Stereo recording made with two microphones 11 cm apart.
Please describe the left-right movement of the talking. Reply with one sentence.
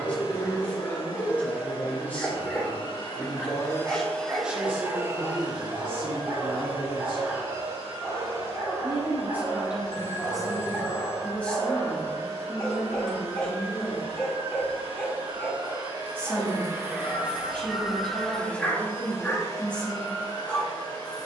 You can hear the talking go right and come back.